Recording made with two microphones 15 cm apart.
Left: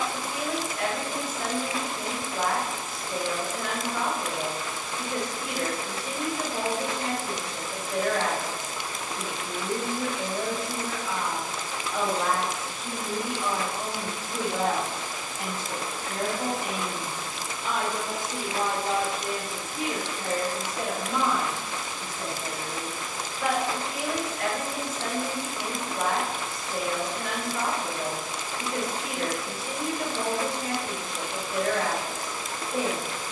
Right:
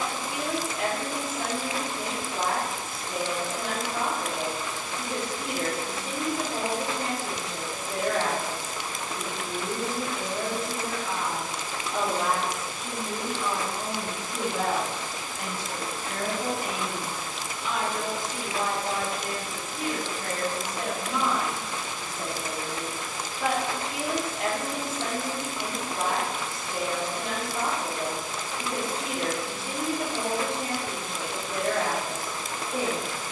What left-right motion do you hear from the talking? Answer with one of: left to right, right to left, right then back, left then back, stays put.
left then back.